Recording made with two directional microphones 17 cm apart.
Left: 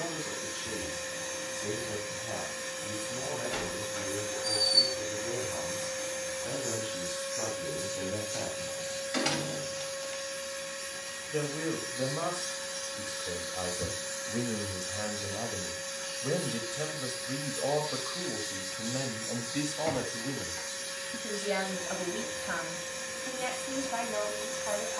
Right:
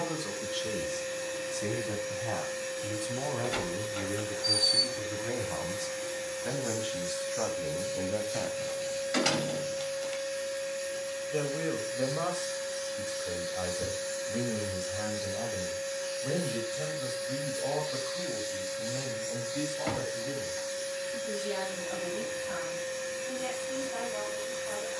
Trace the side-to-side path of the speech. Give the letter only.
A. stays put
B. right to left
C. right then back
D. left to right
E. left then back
B.